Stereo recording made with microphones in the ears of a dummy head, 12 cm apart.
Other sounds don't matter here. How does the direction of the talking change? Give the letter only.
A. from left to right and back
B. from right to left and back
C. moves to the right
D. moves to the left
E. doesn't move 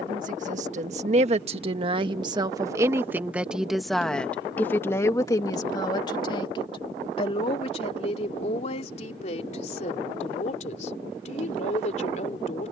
D.